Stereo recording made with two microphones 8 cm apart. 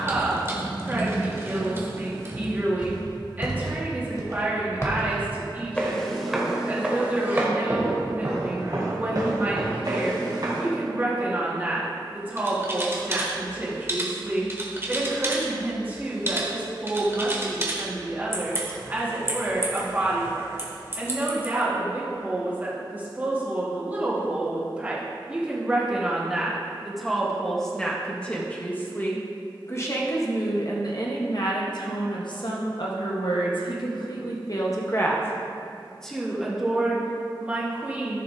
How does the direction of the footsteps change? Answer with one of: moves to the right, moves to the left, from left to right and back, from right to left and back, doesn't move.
moves to the right.